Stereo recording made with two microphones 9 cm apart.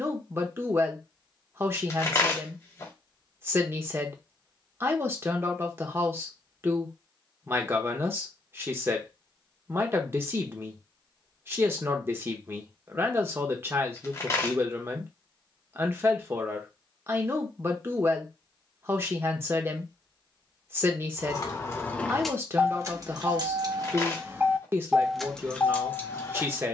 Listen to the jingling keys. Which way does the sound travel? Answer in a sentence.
In this clip you hear the jingling keys go right and come back.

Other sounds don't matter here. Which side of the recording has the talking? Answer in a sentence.
In this clip you hear the talking on the right.